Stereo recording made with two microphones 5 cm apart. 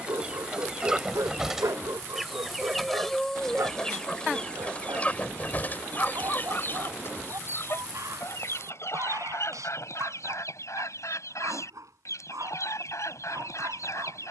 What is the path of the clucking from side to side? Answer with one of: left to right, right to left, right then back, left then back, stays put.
right to left.